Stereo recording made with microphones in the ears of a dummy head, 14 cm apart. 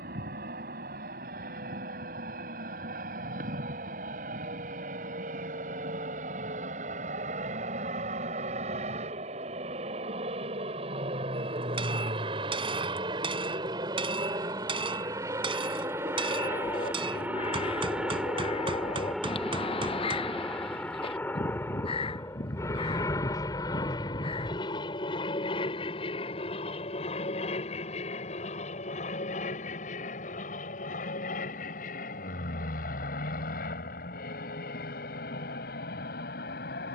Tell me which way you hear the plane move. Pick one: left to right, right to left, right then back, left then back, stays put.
right to left.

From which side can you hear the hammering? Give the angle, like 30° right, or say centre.
30° right.